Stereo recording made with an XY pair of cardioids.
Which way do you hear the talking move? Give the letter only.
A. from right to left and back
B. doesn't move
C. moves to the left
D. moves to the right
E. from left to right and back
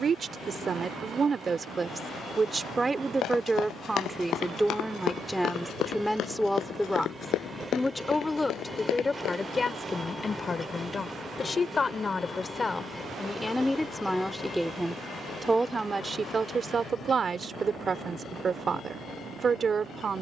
A.